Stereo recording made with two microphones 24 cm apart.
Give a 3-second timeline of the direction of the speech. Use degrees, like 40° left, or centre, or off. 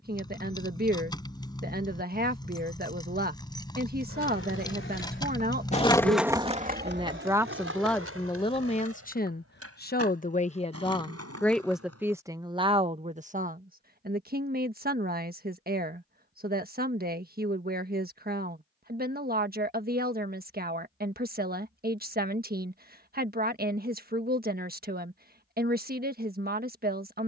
40° right, 40° right, centre, 30° left, 30° right, 40° right, 40° right, 40° right, 40° right.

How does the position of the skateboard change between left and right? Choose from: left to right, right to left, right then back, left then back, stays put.
left to right.